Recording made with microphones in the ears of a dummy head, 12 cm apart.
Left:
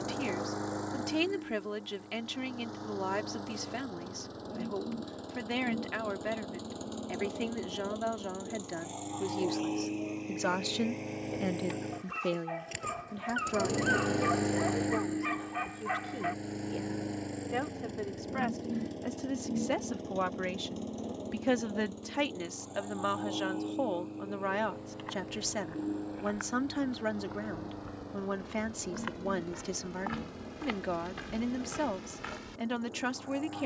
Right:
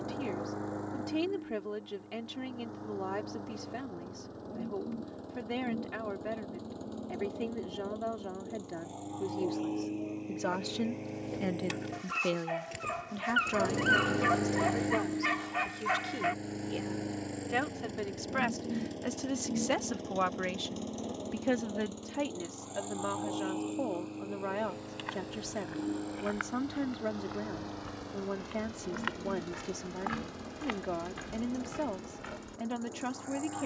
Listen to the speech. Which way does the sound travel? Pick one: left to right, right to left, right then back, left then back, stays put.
right then back.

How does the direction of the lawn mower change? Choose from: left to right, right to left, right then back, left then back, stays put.
left to right.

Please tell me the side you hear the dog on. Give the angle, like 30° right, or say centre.
80° right.